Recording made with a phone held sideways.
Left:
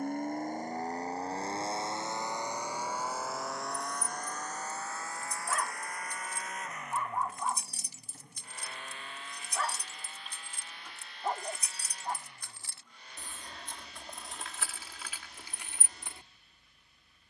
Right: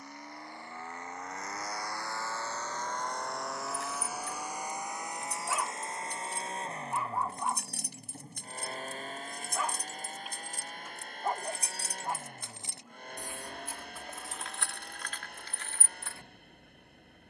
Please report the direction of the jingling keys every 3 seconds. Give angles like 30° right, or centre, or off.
off, 70° right, 60° right, 40° right, 10° right, 10° left.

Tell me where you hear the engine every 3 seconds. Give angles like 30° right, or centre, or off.
30° left, 10° right, 30° right, 40° right, 50° right, 50° right.